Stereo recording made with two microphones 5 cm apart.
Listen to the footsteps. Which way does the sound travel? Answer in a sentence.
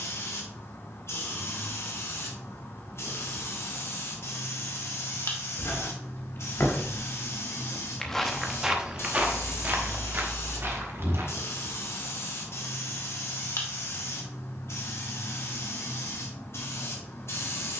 You can hear the footsteps travel towards the right.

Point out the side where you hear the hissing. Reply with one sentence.
In this clip you hear the hissing on the left.